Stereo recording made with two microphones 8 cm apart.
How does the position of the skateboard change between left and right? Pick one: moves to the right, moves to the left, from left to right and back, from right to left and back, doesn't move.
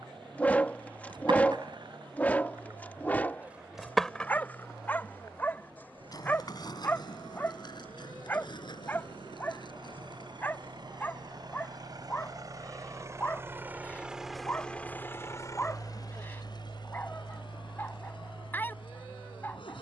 moves to the left.